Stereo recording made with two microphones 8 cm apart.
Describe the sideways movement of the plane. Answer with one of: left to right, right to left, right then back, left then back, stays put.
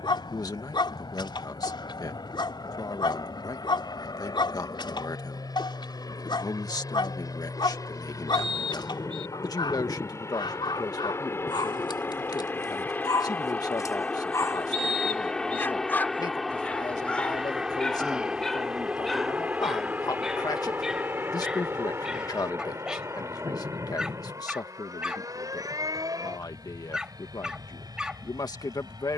left to right.